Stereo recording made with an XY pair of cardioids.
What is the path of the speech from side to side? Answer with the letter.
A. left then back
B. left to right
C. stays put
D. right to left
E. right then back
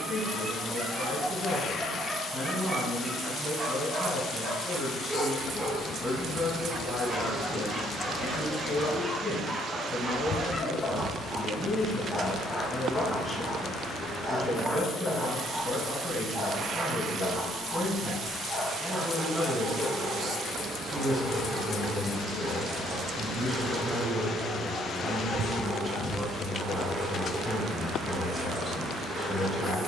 C.